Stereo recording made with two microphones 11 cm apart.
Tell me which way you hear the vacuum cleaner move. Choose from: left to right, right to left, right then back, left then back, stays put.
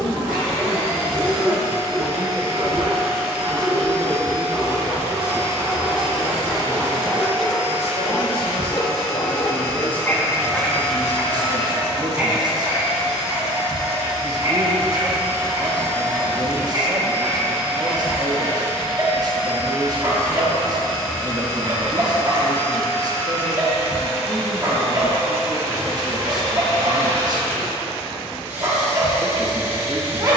stays put.